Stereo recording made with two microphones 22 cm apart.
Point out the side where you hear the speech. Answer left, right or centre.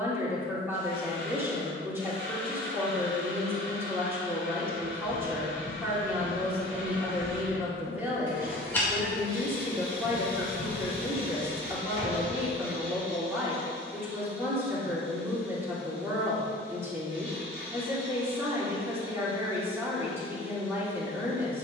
centre.